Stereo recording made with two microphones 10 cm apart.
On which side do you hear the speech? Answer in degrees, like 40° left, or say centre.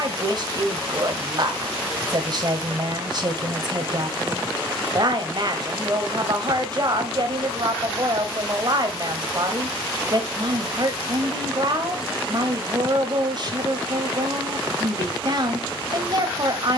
50° right.